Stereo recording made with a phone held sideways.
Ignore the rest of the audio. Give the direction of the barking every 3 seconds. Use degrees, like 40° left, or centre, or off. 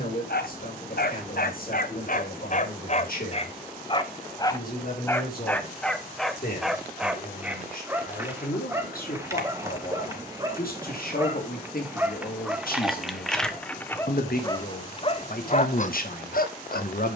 60° left, 20° left, 10° right, 20° right, 10° left, 50° left.